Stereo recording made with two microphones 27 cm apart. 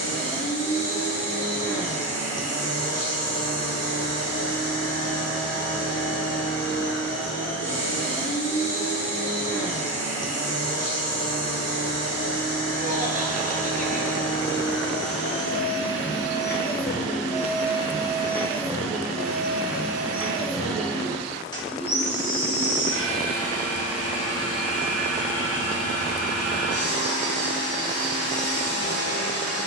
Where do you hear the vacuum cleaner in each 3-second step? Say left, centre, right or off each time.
left, left, left, left, left, left, centre, left, left, left.